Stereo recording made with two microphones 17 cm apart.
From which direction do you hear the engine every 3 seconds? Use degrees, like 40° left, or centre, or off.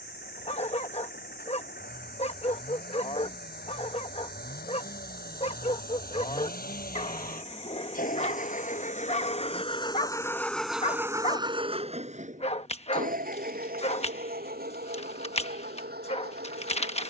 80° left, 70° left, 60° left, centre, 60° right, 80° right.